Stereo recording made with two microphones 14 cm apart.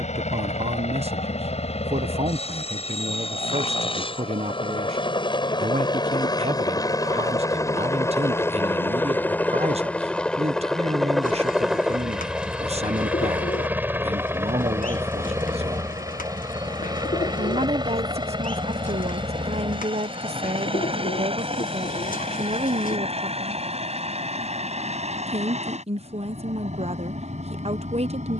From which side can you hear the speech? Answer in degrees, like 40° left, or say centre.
50° right.